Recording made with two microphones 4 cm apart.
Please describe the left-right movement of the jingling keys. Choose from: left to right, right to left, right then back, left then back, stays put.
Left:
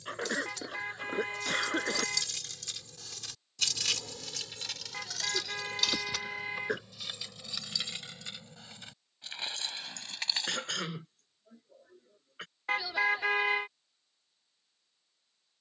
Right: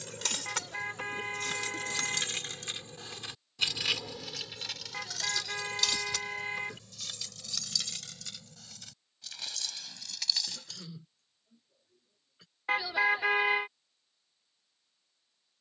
right to left.